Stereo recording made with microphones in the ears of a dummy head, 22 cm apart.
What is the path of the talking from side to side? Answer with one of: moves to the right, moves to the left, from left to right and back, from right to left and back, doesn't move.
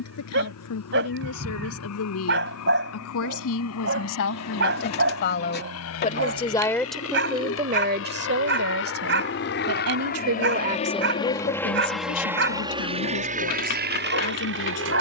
from left to right and back.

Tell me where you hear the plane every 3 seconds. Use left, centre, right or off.
left, left, left, left, right.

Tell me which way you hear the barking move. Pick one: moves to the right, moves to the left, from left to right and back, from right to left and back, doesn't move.
doesn't move.